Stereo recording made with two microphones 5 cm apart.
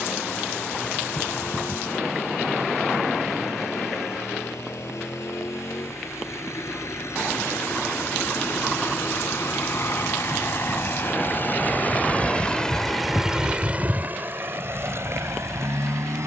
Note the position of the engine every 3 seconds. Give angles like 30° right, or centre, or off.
70° left, 70° left, 60° left, 50° left, 20° right, 70° right.